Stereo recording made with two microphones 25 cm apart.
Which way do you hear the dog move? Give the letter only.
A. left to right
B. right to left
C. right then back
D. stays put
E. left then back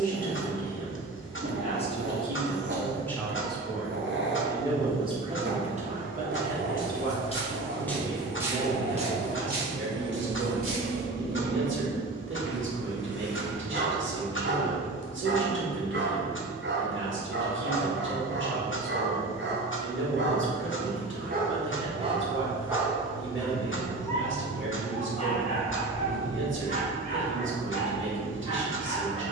B.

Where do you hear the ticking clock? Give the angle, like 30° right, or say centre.
50° left.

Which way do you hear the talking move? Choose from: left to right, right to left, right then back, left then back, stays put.
left to right.